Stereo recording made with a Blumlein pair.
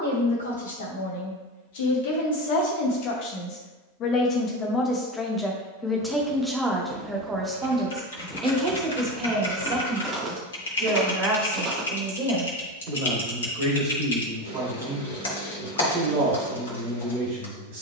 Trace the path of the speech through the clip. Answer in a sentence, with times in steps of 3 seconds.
You can hear the speech on the left from 0 s, in the centre from 6 s and on the right from 9 s.